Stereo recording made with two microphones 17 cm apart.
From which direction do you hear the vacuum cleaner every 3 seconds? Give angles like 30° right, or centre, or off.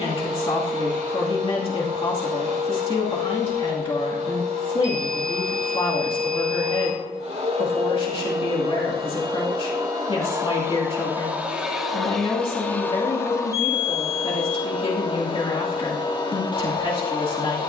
50° right, 50° right, 40° right, 20° right, 20° left, 30° left.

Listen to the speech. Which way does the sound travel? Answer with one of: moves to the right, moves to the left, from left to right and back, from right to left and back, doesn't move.
doesn't move.